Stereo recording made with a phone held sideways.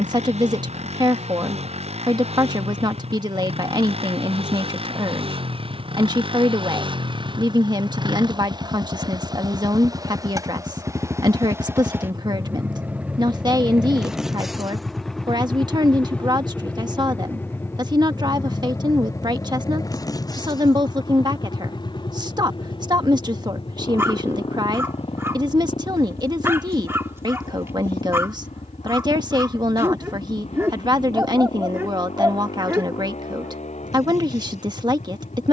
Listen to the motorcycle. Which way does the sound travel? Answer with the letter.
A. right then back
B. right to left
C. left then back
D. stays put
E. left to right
B.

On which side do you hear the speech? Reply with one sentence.
In this clip you hear the speech on the right.